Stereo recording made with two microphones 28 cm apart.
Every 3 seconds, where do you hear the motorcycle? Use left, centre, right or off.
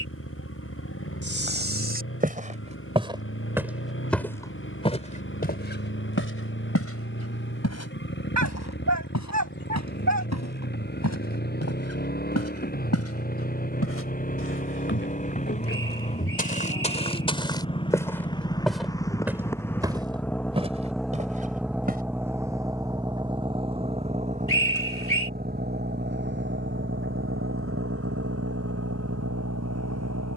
left, left, left, left, left, left, centre, centre, right, right.